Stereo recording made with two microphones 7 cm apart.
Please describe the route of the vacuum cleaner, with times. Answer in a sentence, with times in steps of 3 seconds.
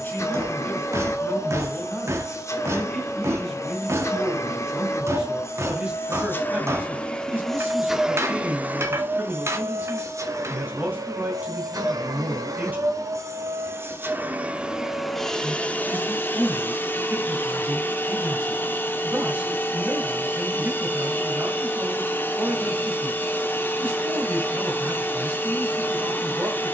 In this clip you hear the vacuum cleaner on the left from 0 s, in the centre from 6 s, on the right from 9 s and on the left from 15 s.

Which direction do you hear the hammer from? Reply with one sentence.
In this clip you hear the hammer on the right.